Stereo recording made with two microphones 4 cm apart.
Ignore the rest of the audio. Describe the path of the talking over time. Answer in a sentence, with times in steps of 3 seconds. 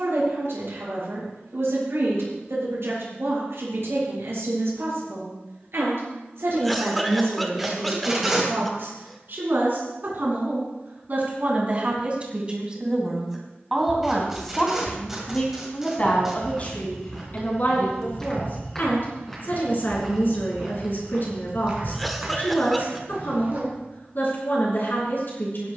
You can hear the talking on the right from 0 s, in the centre from 12 s and on the left from 15 s.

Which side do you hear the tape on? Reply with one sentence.
You can hear the tape in the centre.